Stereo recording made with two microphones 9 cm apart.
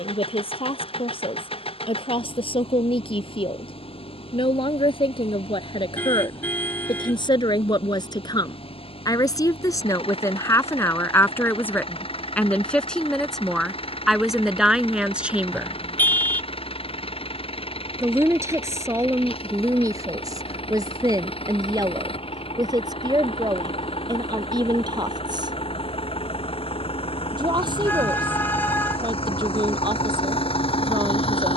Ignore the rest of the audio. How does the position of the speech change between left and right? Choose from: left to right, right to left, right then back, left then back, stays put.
left to right.